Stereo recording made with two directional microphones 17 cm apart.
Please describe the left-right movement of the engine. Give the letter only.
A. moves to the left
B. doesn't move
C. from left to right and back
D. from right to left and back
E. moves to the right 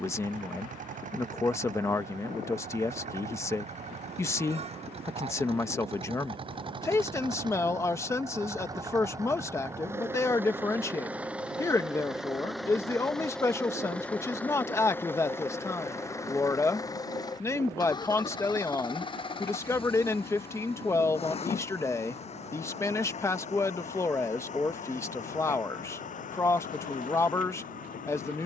A.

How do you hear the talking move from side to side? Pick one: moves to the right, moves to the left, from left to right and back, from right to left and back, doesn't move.
doesn't move.